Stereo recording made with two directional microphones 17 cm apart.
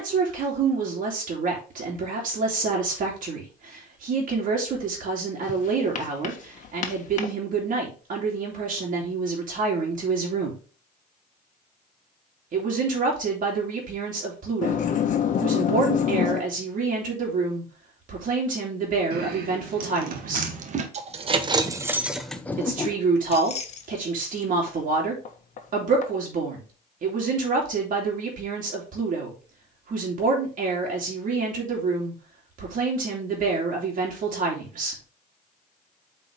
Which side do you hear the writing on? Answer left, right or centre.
left.